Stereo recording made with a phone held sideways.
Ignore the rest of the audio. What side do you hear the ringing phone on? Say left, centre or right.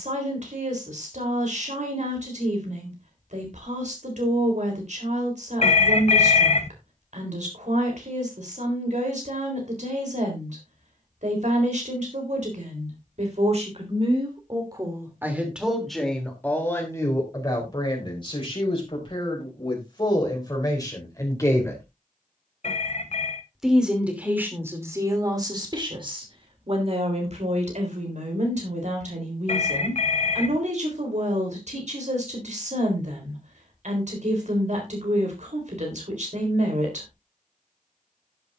left.